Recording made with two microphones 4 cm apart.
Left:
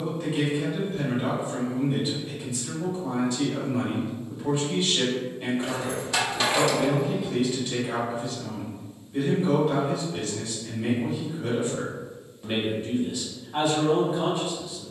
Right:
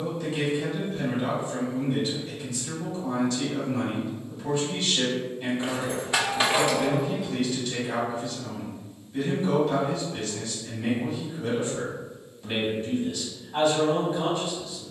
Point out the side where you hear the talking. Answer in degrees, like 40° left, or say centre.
20° left.